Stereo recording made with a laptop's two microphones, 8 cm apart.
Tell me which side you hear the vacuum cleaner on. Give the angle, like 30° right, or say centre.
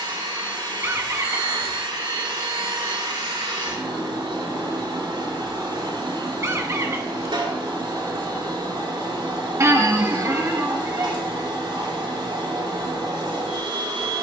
80° right.